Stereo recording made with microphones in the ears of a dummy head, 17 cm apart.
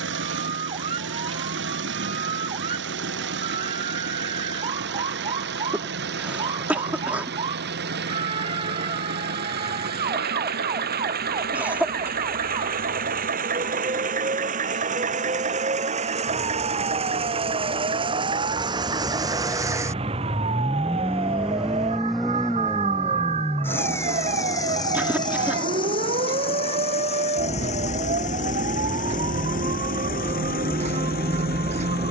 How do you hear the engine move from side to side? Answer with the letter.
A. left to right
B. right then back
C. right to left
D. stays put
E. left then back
C.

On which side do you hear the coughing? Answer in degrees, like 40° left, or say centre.
10° right.